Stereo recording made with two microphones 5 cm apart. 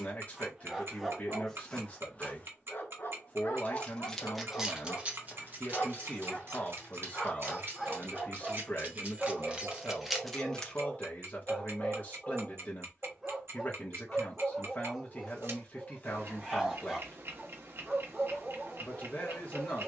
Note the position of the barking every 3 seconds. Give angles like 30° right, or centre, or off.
10° left, 50° left, 10° left, 10° right, 10° right, 10° right, 10° right.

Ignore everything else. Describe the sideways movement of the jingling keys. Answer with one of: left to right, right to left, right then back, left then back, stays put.
right then back.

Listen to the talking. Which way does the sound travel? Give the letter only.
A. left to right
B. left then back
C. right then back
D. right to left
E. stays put
E.